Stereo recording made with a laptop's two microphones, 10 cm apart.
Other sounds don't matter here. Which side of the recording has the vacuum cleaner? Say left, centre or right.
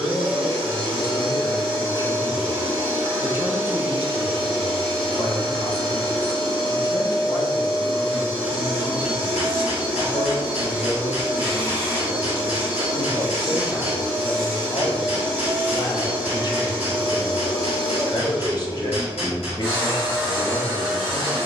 centre.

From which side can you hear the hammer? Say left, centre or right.
left.